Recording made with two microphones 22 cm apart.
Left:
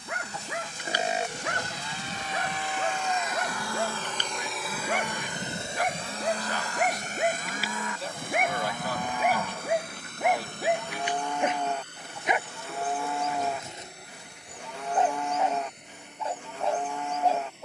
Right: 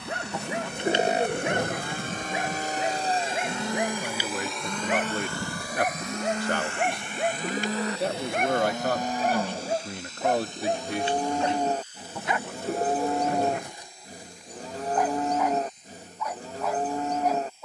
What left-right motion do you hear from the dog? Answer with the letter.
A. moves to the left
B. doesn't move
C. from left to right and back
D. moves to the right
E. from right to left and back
A.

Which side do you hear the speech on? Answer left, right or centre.
right.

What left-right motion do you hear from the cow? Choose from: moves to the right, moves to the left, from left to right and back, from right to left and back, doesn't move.
doesn't move.